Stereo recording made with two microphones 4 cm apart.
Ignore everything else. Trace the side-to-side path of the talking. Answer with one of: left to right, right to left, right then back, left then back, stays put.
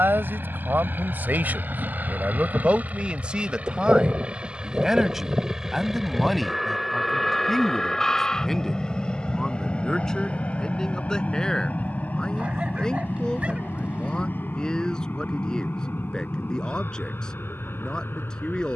right to left.